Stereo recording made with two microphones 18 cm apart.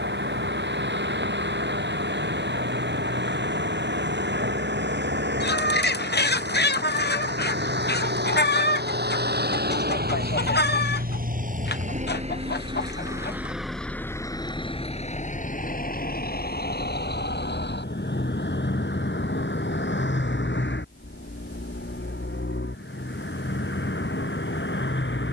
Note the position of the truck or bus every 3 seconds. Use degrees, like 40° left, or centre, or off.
80° right, 80° right, 70° right, 60° right, centre, 50° left, 70° left, 80° left, 80° left.